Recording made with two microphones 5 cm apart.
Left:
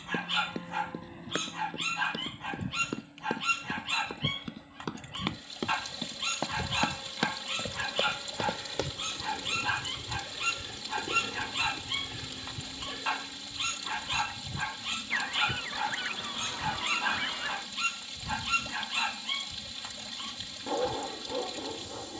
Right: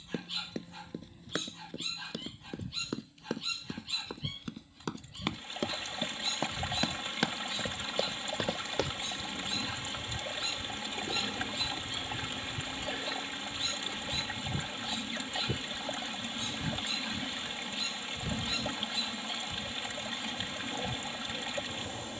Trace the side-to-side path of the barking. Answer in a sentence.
You can hear the barking stay put.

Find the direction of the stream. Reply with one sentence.
In this clip you hear the stream on the right.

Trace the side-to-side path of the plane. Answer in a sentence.
In this clip you hear the plane travel towards the right.